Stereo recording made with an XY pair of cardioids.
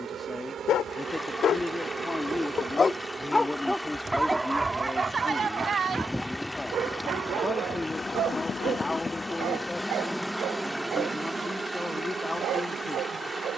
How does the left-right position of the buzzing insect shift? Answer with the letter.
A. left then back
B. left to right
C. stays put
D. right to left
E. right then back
A.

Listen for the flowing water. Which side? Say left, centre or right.
centre.